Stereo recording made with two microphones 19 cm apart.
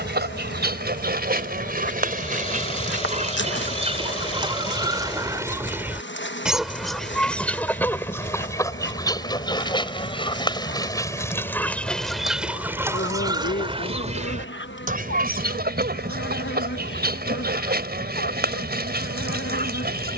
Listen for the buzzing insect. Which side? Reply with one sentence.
You can hear the buzzing insect on the left.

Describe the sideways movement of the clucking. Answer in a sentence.
You can hear the clucking go left and come back.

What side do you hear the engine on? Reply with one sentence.
In this clip you hear the engine on the left.